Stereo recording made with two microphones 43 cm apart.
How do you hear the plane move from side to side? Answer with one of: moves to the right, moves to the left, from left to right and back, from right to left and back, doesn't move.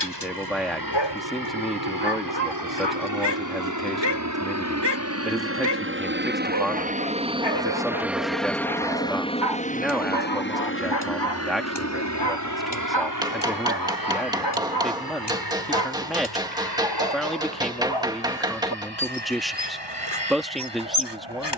moves to the left.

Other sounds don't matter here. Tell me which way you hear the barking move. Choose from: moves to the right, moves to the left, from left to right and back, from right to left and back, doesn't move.
doesn't move.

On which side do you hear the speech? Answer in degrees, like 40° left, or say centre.
centre.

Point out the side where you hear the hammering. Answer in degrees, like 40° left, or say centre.
10° right.